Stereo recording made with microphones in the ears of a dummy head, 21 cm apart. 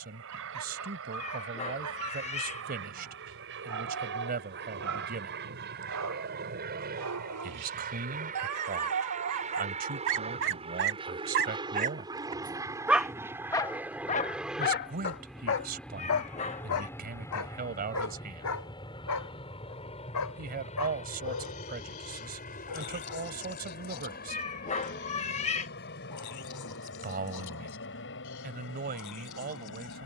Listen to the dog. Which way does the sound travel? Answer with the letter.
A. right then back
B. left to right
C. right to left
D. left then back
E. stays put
C.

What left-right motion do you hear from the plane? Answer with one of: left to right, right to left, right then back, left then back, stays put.
right to left.